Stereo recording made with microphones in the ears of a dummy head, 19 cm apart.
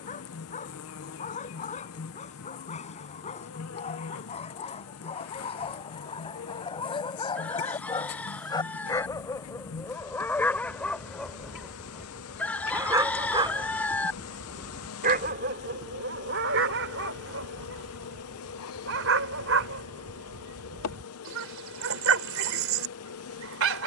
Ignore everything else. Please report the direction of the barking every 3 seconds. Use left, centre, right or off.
left, left, left, centre, right, right, right, right.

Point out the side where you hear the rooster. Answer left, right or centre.
centre.